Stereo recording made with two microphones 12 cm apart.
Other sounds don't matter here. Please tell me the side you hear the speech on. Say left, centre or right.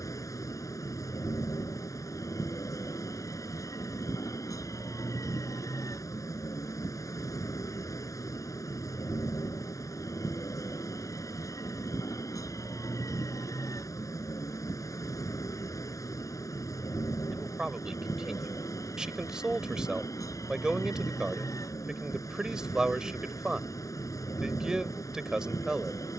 centre.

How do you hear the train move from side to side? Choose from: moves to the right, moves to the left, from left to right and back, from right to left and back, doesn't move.
doesn't move.